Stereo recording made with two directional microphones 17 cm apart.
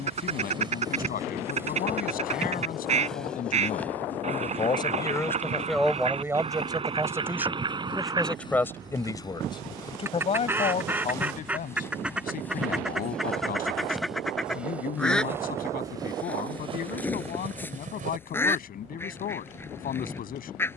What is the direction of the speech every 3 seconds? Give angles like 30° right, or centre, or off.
60° left, 30° left, centre, 40° left, 50° left, 50° left, 50° left.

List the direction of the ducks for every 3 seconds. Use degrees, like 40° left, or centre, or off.
40° right, 40° right, 30° right, 10° right, centre, 10° left, 10° left.